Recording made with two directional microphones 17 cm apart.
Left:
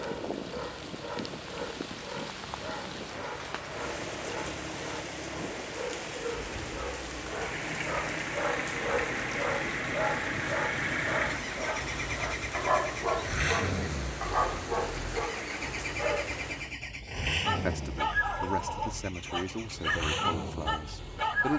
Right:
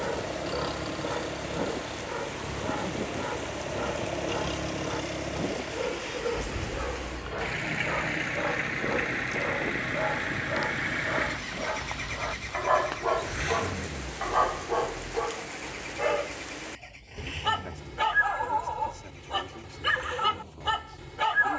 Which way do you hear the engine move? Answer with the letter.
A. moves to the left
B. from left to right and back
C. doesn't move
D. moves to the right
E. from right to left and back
A.